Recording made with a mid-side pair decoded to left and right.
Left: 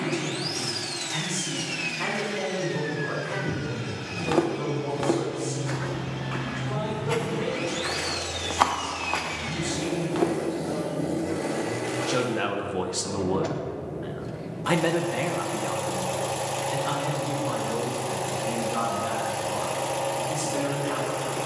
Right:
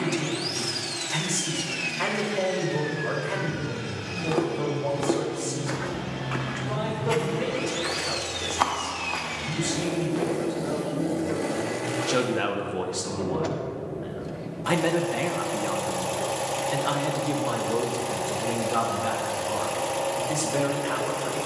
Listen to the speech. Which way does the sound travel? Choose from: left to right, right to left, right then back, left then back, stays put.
left then back.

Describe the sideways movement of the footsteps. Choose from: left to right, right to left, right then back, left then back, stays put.
right then back.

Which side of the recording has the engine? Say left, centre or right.
centre.